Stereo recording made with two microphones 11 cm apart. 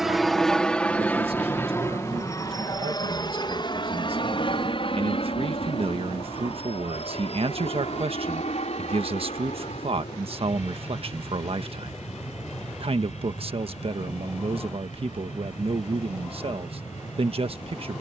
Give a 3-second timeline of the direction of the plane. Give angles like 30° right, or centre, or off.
20° left, 50° left, 60° left, 70° left, 70° left, 70° left.